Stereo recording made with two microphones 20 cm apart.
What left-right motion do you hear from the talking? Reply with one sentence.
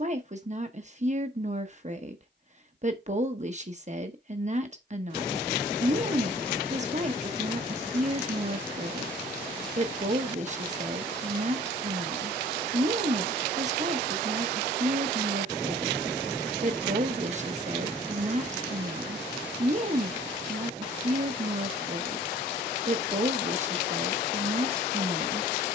You can hear the talking stay in one place.